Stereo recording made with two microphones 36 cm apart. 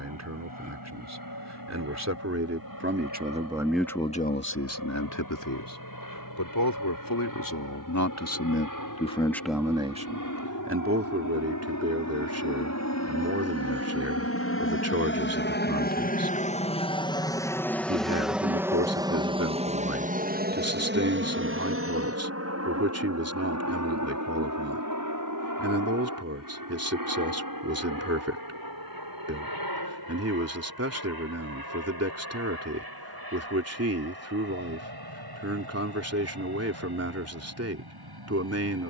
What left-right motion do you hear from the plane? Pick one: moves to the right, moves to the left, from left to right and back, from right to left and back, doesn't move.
moves to the right.